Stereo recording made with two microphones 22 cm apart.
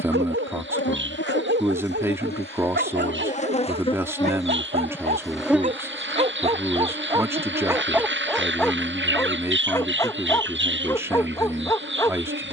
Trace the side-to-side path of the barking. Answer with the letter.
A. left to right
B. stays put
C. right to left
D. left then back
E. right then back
C.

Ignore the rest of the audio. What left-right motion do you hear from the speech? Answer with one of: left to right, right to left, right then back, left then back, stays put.
stays put.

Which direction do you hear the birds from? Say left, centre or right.
right.